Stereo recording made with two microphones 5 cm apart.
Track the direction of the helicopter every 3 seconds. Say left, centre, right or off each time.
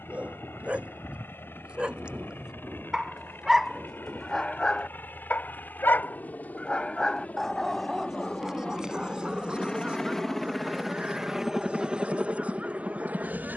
left, left, left, centre, right.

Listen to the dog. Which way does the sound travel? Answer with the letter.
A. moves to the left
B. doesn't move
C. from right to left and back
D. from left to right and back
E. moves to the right
C.